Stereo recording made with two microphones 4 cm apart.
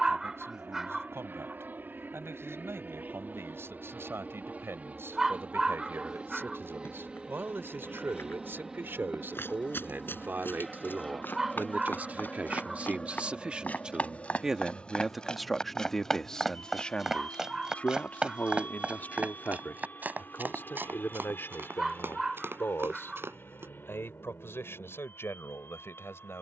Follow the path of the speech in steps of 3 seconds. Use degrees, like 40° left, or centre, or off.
70° right, 70° right, 60° right, 50° right, 30° right, 10° left, 50° left, 60° left, 70° left.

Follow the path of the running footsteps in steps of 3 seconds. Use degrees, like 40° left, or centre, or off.
off, off, 60° left, 50° left, 40° left, centre, 40° right, 60° right, off.